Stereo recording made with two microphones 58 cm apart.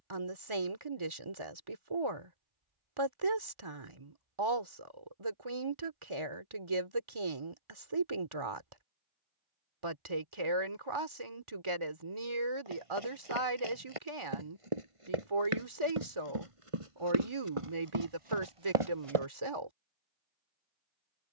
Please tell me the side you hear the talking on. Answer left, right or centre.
right.